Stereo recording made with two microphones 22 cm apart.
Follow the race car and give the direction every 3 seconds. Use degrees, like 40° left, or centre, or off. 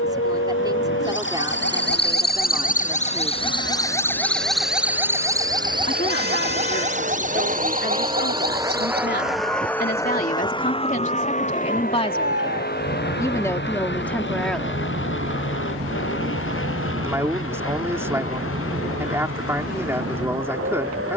80° right, 60° right, 30° right, 20° left, 50° left, 60° left, 70° left.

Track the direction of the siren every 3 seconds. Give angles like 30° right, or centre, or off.
60° left, centre, 40° right, 50° right, 60° right, 60° right, 60° right.